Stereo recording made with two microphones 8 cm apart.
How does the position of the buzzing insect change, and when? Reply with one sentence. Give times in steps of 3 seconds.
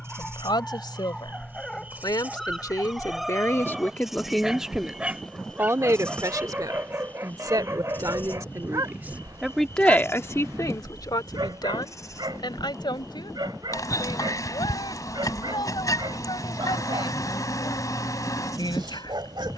You can hear the buzzing insect on the right from 0 s, in the centre from 3 s and on the left from 6 s.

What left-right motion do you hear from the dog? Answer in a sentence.
You can hear the dog move from left to right.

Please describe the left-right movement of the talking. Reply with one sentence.
You can hear the talking go right and come back.